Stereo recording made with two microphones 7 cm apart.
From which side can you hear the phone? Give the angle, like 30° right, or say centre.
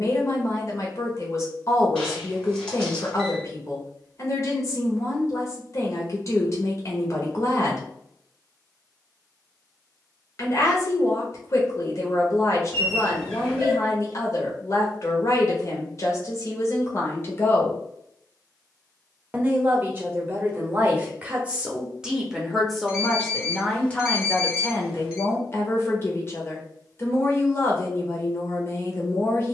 10° left.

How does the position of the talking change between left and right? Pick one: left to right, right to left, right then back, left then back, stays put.
right then back.